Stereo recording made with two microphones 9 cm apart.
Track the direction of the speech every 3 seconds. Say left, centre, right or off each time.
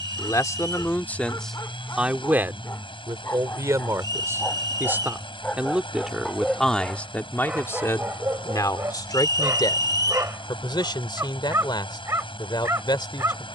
centre, right, left, left, left.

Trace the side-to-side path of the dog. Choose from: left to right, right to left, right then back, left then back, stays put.
left to right.